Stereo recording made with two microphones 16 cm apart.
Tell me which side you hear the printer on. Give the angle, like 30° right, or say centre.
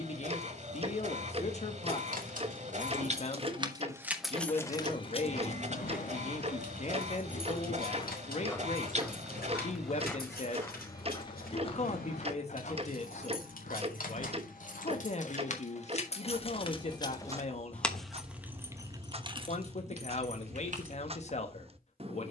50° right.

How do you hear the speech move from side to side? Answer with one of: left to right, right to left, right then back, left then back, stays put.
stays put.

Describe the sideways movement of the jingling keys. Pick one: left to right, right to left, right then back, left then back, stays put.
left then back.